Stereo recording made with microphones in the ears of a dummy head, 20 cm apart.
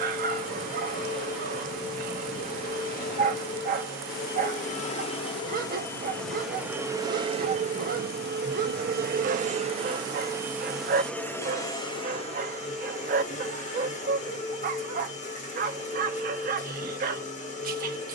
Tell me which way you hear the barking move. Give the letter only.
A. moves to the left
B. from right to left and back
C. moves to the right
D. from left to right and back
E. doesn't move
E.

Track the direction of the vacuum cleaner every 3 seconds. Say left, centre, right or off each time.
left, left, right, centre, left, left.